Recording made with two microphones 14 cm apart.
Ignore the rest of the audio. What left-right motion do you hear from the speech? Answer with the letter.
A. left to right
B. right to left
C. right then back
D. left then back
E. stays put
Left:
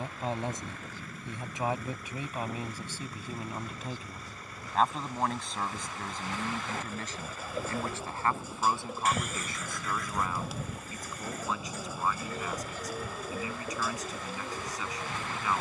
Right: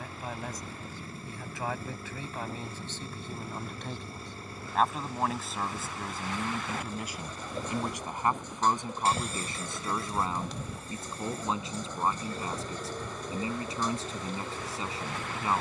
A.